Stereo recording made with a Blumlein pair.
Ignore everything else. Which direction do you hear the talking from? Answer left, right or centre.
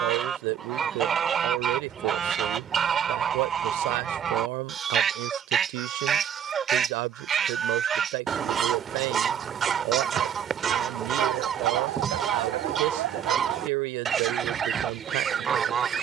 right.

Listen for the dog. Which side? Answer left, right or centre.
right.